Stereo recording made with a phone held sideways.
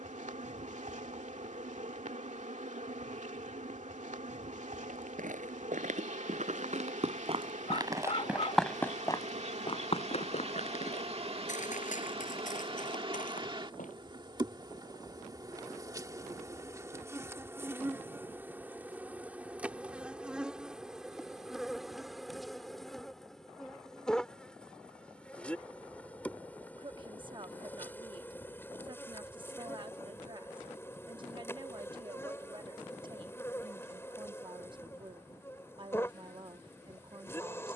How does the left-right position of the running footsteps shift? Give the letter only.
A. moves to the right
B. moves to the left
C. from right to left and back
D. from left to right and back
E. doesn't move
B.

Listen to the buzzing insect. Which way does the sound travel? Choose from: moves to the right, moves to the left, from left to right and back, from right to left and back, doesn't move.
moves to the left.